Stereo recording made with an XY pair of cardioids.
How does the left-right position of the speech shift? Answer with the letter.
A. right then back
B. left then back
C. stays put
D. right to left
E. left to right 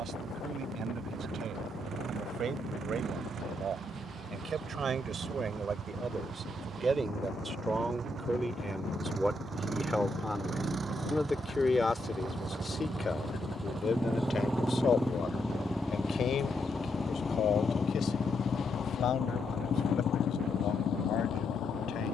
D.